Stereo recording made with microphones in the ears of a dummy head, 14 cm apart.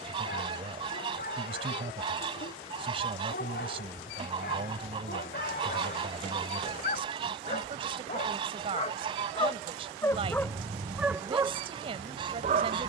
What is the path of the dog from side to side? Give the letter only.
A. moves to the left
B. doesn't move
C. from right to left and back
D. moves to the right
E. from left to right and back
D.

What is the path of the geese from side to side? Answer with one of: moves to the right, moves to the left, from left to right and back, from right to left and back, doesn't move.
doesn't move.